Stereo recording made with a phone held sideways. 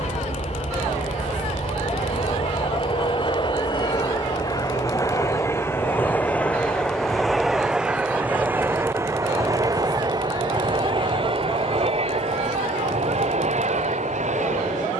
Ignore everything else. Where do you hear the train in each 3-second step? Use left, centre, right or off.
left, left, centre, right, right.